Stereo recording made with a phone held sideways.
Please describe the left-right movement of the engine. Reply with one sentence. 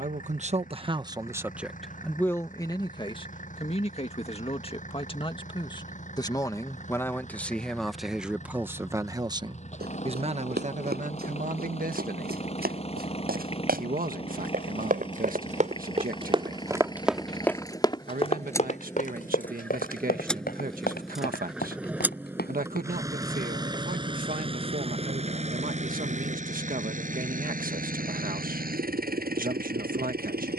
You can hear the engine move to the right.